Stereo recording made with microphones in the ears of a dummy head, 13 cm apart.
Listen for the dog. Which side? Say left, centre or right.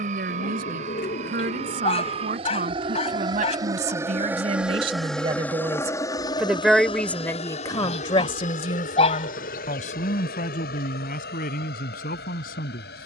left.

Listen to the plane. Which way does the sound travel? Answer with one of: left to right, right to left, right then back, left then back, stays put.
right to left.